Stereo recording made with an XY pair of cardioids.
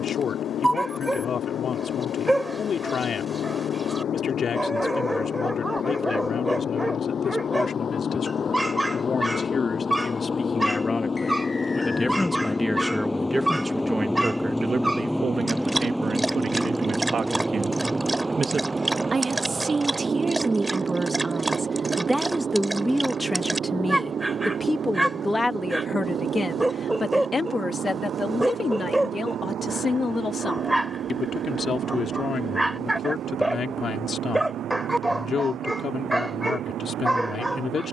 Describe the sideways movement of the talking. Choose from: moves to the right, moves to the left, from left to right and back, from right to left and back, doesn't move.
from left to right and back.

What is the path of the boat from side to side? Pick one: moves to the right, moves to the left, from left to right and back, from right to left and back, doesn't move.
moves to the right.